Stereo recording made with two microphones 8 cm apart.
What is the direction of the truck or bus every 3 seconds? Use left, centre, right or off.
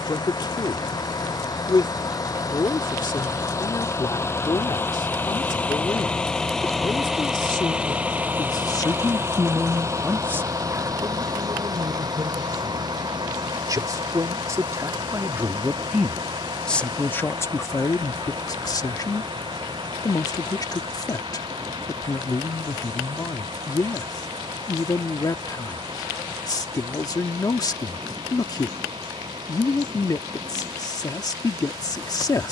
left, left, centre, right, right, right, right, right, right, right, right.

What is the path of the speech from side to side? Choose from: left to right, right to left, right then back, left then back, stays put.
right then back.